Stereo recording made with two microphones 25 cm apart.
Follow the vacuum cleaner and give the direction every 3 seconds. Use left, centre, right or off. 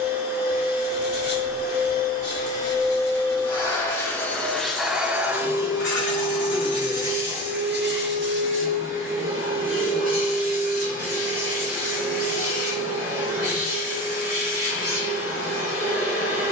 left, centre, right, right, right, right.